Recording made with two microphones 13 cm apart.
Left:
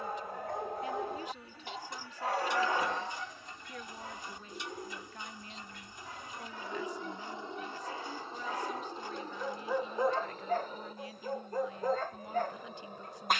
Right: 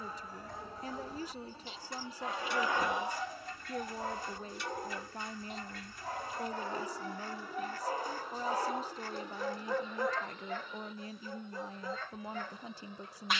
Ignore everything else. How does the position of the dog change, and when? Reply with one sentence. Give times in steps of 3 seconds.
In this clip you hear the dog on the left from 0 s, on the right from 3 s and on the left from 9 s.